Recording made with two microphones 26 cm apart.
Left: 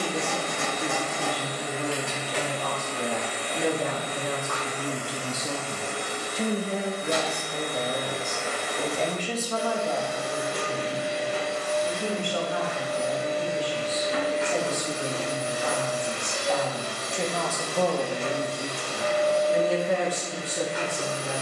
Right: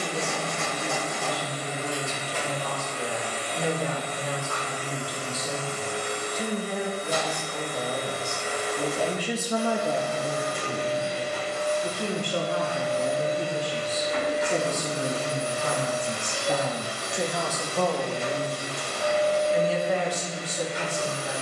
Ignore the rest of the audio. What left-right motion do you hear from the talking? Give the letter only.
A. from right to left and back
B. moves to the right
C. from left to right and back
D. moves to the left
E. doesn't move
C.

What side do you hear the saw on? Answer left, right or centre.
left.